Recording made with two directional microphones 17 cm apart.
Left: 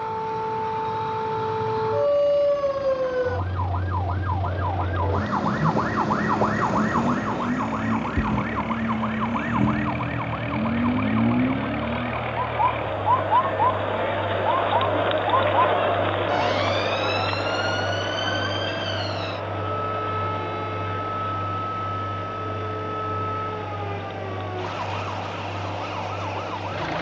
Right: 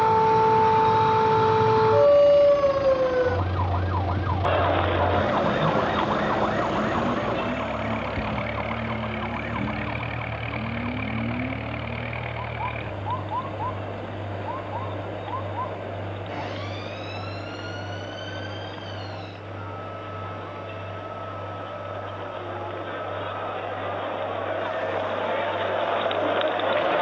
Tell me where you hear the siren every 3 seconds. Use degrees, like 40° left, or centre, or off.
40° right, centre, 30° left, 50° left, 50° left, 60° left, 60° left, 60° left, 60° left.